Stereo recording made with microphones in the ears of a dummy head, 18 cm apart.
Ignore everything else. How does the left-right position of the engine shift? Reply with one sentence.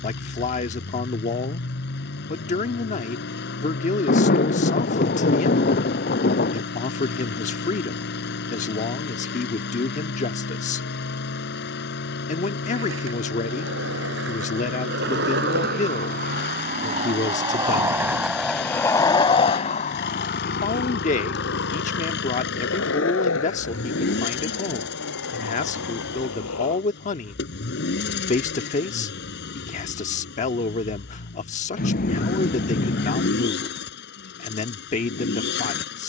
You can hear the engine stay put.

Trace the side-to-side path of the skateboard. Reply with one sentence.
You can hear the skateboard travel towards the left.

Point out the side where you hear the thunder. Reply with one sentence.
In this clip you hear the thunder on the left.